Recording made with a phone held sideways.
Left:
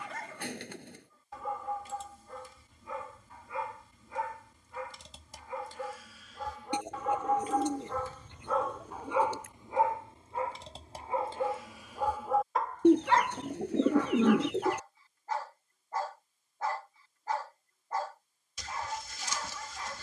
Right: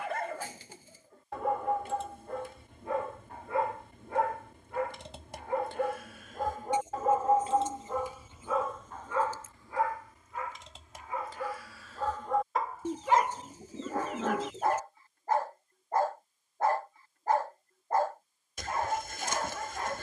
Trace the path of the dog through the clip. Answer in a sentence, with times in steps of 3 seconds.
In this clip you hear the dog on the right from 0 s, on the left from 9 s and on the right from 12 s.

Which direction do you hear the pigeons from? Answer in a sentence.
You can hear the pigeons on the left.